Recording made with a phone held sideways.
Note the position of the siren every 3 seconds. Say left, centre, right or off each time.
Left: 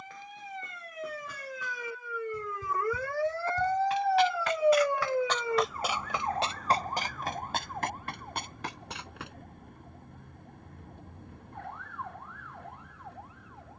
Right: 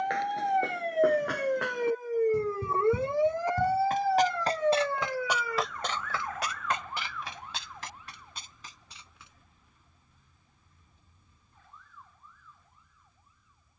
right, centre, left, left, left.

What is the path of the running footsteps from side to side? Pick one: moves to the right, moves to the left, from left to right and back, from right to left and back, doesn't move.
moves to the left.